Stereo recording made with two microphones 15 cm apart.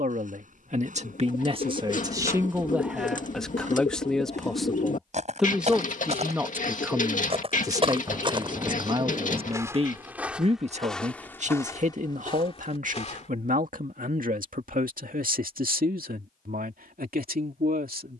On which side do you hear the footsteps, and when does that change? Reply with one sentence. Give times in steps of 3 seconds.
You can hear the footsteps on the right from 0 s, in the centre from 9 s, on the left from 12 s and not at all from 15 s.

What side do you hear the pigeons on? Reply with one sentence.
In this clip you hear the pigeons on the left.